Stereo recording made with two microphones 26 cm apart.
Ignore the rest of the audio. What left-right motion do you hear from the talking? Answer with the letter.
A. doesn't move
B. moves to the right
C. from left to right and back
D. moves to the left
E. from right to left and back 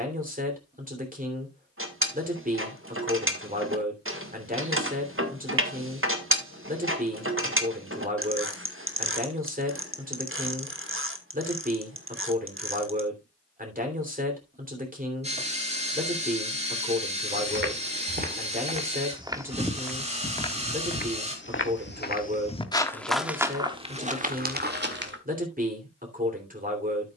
A.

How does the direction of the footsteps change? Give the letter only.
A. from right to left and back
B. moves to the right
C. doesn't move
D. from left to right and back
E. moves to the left
A.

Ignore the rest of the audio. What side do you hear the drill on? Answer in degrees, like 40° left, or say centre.
20° right.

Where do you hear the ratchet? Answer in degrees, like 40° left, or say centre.
50° right.